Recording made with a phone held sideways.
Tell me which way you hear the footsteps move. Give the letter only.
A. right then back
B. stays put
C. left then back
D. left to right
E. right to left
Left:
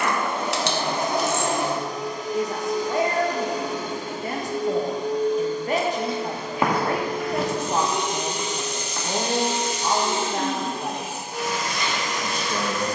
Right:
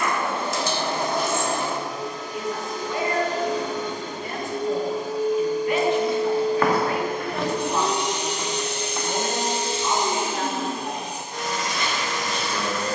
D.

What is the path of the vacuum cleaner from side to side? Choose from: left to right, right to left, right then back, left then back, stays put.
right then back.